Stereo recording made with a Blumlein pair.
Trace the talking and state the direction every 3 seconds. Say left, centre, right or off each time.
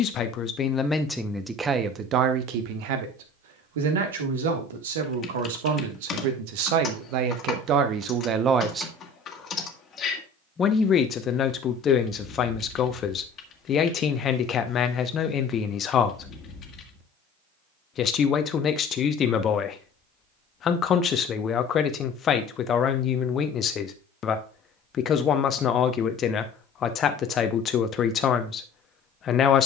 centre, right, right, left, left, left, left, left, left, left.